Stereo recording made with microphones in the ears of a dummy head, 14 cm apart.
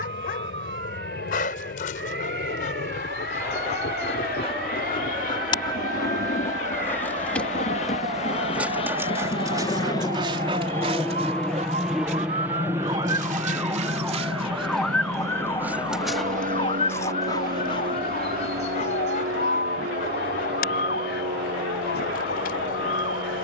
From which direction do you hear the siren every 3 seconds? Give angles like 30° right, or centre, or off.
70° right, 70° right, 60° right, 50° right, 10° right, 30° left, 60° left, 70° left.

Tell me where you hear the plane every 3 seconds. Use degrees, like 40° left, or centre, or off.
70° left, 60° left, 50° left, 20° left, 20° right, 50° right, 60° right, 70° right.